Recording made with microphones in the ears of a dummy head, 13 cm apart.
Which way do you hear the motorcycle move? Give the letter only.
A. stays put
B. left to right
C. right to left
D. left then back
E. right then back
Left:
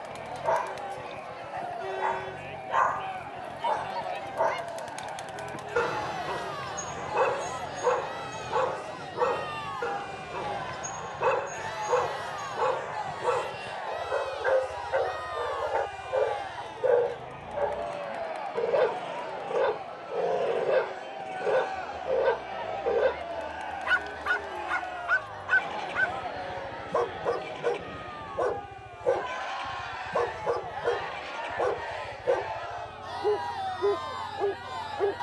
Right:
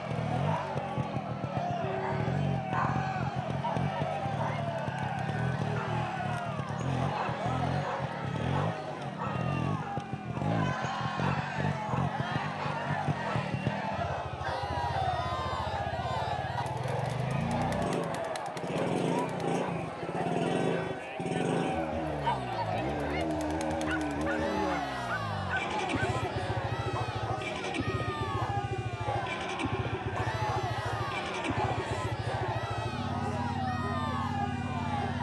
A.